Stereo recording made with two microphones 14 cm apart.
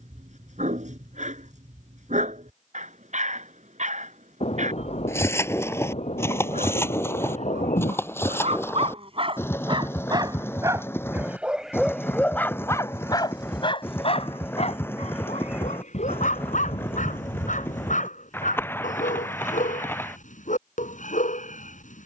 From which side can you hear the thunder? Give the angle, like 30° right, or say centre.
50° left.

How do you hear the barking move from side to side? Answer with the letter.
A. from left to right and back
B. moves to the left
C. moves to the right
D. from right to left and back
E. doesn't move
B.